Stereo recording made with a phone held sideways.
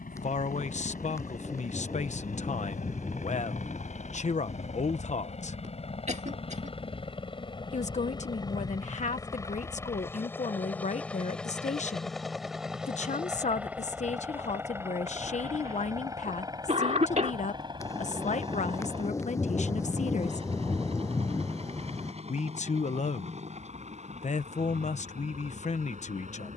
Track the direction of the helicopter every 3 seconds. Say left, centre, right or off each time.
left, left, left, centre, centre, right, right, right, right.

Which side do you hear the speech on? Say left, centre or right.
left.